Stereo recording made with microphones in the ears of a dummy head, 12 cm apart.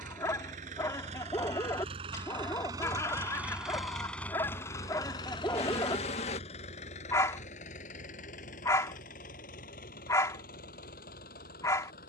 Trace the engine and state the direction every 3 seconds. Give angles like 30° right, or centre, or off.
50° right, 10° left, 60° left, 70° left.